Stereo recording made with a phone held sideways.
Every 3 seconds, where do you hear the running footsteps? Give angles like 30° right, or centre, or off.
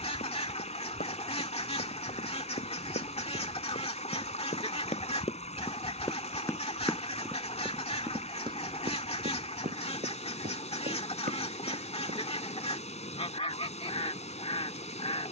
70° left, 50° left, 10° right, 50° right, off.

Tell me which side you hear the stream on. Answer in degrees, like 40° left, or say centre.
50° left.